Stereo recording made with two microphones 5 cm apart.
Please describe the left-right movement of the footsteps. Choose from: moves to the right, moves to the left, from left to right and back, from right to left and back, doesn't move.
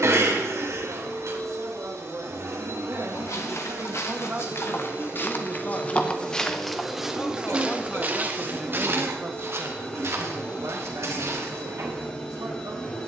moves to the right.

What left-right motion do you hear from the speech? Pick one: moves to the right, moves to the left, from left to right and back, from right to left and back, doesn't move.
from right to left and back.